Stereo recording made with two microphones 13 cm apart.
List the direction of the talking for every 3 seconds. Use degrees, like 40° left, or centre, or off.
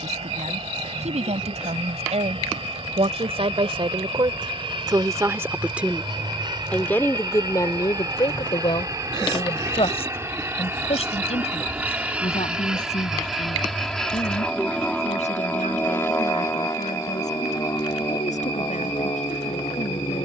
70° right, 40° right, 30° left, 60° left, 70° left, 70° left, 80° left.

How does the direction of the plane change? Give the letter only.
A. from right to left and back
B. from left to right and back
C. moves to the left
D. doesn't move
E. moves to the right
C.